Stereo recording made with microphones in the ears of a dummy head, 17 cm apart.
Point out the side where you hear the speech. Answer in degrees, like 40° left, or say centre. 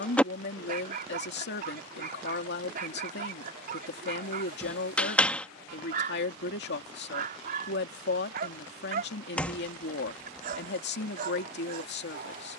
60° left.